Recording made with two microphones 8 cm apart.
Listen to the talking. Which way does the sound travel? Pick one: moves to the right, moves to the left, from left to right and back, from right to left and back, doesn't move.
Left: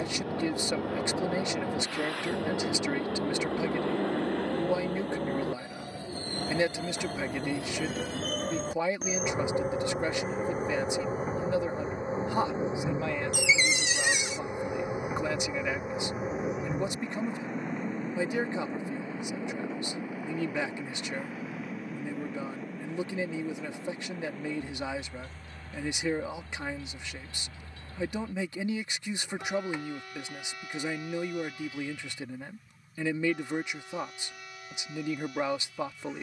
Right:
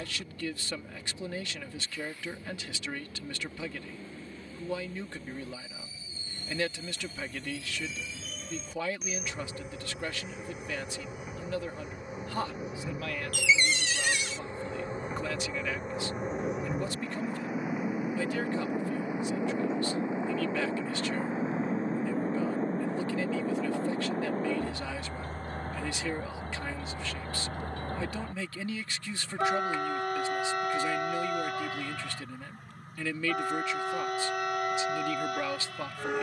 doesn't move.